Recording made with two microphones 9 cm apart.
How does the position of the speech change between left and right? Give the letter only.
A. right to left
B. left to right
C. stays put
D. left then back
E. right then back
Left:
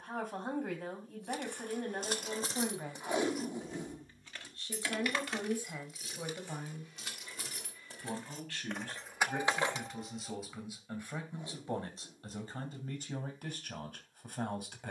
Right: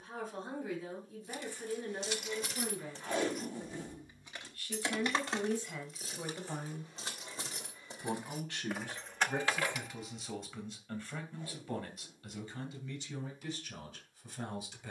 E.